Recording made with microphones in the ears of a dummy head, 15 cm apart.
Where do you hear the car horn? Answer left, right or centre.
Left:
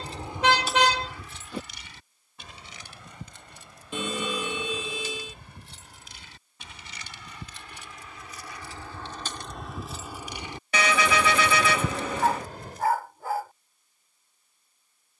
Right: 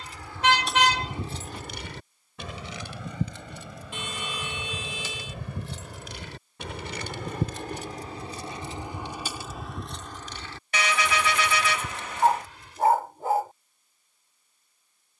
left.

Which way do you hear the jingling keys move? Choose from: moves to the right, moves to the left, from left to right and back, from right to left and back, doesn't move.
from left to right and back.